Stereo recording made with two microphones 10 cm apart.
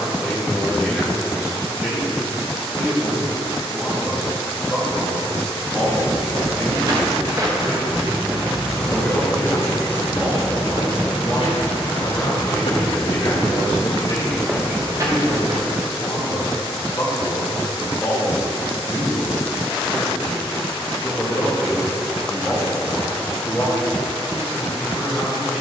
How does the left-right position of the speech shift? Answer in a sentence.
In this clip you hear the speech go left and come back.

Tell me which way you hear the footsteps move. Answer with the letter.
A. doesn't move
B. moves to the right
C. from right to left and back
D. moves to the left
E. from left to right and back
C.